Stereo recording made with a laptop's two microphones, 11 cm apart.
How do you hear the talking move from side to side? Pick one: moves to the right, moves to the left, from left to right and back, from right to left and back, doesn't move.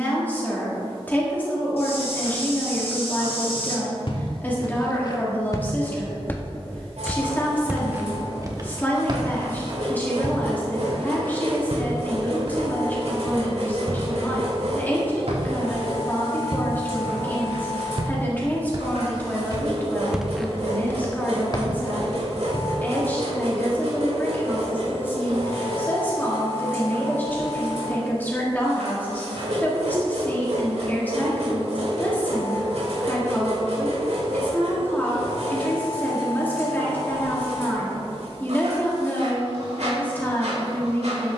doesn't move.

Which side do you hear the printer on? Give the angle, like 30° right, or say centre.
80° right.